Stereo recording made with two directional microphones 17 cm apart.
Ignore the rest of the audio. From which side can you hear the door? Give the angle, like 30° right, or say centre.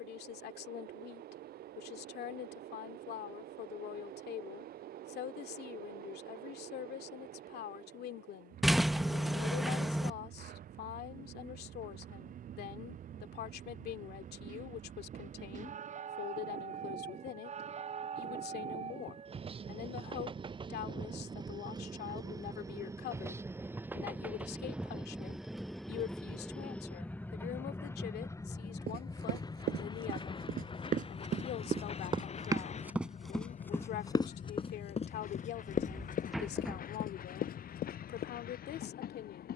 centre.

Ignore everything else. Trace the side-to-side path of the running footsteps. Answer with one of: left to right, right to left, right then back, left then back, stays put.
right to left.